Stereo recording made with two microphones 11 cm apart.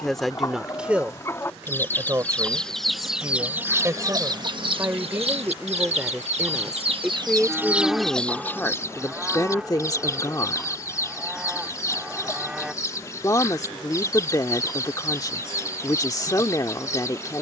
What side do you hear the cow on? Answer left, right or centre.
centre.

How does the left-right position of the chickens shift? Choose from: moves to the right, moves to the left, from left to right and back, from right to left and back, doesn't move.
from left to right and back.